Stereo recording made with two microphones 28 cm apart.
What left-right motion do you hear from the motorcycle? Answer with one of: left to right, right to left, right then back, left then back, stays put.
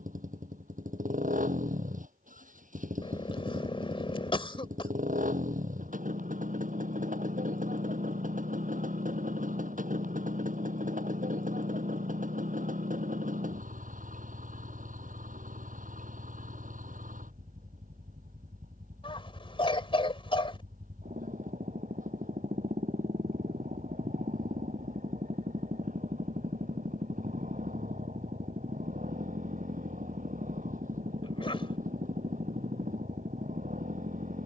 stays put.